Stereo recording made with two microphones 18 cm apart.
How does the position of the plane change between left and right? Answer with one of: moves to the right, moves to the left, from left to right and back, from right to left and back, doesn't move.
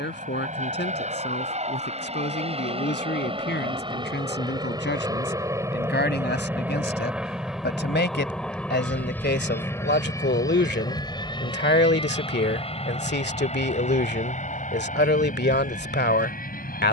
moves to the left.